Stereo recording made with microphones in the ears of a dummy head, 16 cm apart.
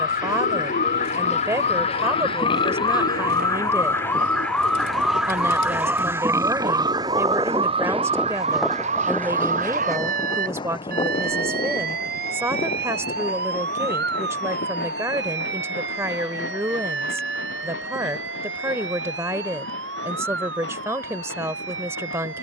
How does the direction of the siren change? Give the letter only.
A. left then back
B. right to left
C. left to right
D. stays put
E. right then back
C.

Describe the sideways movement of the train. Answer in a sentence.
You can hear the train go from the right side to the left.